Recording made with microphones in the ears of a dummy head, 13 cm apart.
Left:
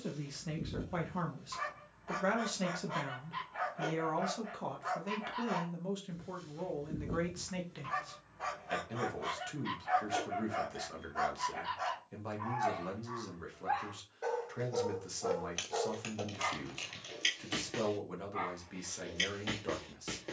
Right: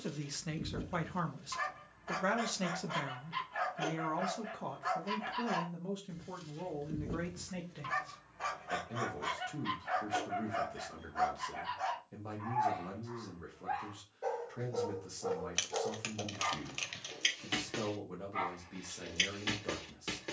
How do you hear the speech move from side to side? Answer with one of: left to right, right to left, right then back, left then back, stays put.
right to left.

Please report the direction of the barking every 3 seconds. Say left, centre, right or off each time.
right, right, right, centre, left, centre, right.